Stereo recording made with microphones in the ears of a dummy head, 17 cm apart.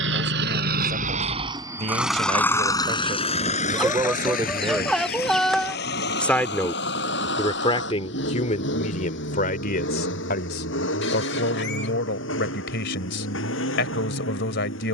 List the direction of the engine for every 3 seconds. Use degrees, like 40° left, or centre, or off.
20° right, 40° left, 60° left, 60° left, 70° left.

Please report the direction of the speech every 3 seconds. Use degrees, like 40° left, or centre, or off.
40° right, 20° right, 30° left, 60° left, 70° left.